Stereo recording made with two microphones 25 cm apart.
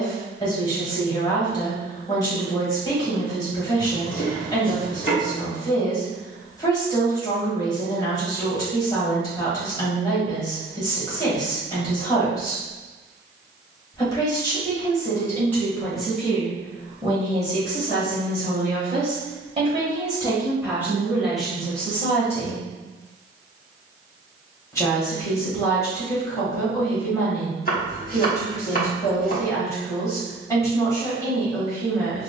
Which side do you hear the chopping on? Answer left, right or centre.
left.